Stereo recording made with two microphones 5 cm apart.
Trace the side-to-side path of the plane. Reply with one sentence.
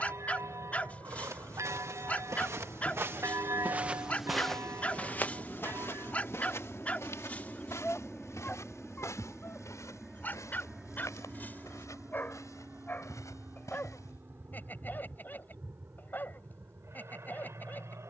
You can hear the plane move from left to right.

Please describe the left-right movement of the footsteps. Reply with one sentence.
In this clip you hear the footsteps travel towards the left.